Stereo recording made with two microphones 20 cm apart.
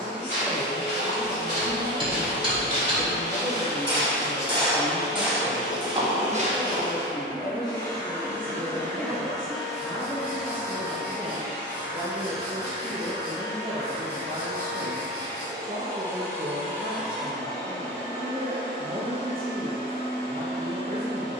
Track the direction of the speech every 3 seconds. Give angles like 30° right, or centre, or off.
40° left, 40° left, 30° left, 10° left, 30° right, 50° right, 50° right.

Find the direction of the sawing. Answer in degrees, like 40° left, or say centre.
20° right.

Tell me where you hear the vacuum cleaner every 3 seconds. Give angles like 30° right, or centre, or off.
70° left, 50° left, 20° left, 10° right, 20° right, 10° right, 40° left.